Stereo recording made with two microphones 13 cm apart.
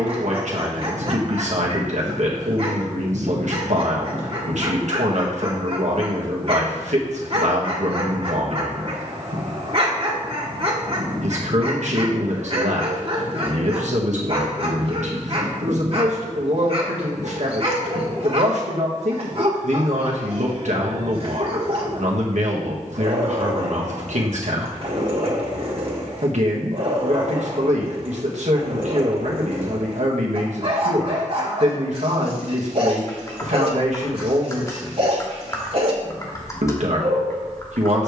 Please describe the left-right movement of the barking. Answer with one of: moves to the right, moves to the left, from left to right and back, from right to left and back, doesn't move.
doesn't move.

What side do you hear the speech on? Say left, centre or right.
right.